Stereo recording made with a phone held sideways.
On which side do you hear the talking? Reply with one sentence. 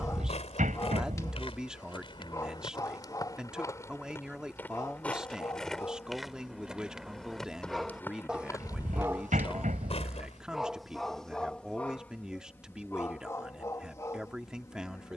You can hear the talking in the centre.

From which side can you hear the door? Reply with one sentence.
You can hear the door on the right.